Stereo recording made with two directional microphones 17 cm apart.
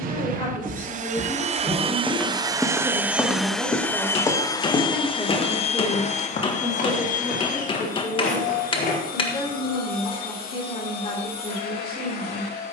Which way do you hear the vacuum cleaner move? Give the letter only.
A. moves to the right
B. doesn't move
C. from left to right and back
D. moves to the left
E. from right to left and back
D.